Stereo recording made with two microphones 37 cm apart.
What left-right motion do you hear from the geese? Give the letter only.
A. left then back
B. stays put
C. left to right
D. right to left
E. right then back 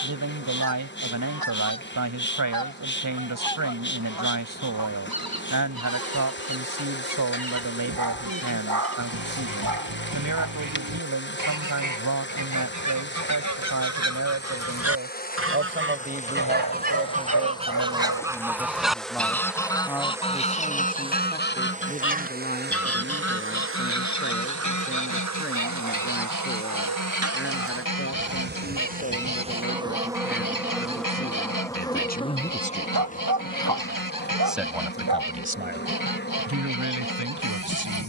D.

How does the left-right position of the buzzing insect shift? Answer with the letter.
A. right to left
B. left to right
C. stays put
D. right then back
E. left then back
D.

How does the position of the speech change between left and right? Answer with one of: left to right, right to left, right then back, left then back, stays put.
left then back.